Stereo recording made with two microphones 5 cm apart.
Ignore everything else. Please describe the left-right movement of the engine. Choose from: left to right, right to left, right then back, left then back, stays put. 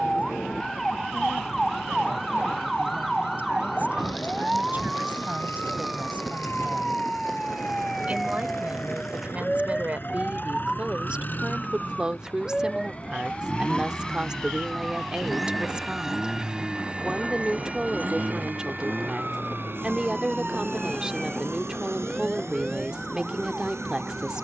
left to right.